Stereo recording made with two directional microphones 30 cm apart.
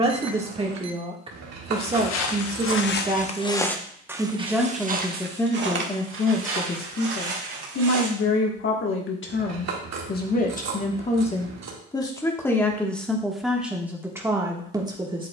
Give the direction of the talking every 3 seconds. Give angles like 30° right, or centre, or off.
20° right, centre, 40° left, 30° left, centre.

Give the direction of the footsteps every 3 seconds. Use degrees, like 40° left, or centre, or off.
50° left, 10° right, 50° right, off, off.